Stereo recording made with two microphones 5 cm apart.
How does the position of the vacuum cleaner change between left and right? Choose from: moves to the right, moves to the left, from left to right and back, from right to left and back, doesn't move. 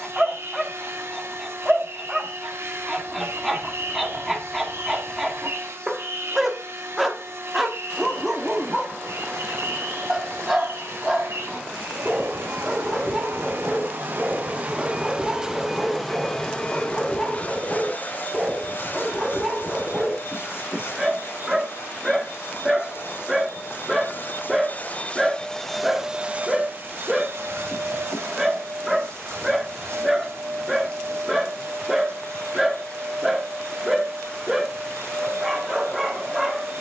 from right to left and back.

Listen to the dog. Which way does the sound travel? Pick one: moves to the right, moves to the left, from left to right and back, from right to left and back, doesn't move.
doesn't move.